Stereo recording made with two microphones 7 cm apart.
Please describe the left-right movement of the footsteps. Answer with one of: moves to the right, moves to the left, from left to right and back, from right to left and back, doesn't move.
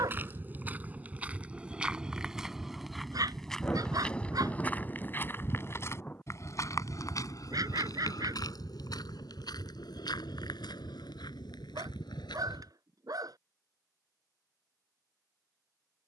moves to the left.